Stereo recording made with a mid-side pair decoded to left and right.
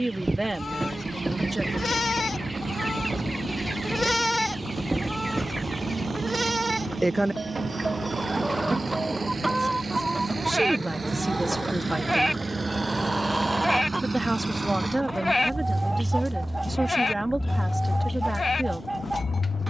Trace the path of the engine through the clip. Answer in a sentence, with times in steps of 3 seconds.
You can hear the engine on the right from 0 s, in the centre from 15 s and on the left from 18 s.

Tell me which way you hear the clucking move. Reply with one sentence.
In this clip you hear the clucking stay put.